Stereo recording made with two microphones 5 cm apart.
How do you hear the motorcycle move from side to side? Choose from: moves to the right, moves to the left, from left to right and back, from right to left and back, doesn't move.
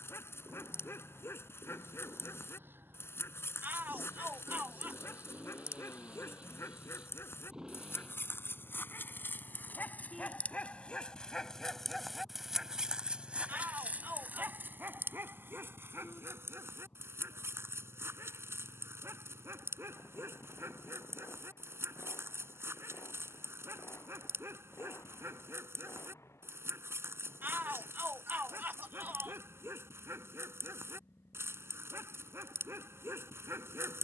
moves to the left.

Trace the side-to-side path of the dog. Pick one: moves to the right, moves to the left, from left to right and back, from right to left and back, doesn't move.
moves to the right.